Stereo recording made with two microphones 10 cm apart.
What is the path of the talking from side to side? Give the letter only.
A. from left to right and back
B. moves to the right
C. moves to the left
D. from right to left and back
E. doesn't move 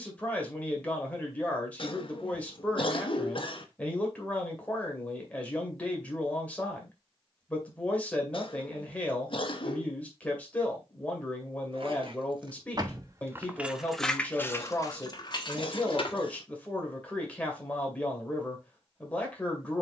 E.